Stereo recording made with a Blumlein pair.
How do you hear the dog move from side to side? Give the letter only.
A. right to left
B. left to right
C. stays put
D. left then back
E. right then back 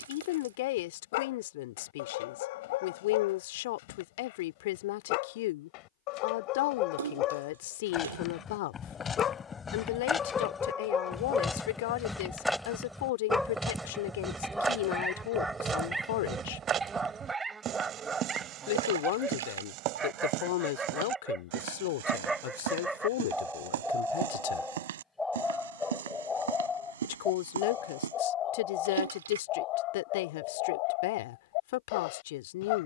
E.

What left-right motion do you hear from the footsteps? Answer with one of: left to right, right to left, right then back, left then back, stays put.
left to right.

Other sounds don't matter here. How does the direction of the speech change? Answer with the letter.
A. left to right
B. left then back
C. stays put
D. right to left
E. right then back
C.